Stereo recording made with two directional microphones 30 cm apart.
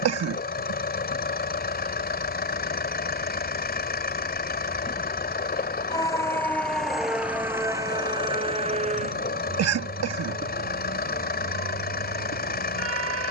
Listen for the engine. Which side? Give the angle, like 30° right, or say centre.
30° left.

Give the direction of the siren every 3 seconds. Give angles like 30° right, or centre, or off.
50° left, 30° left, 10° right, 30° right, 50° right.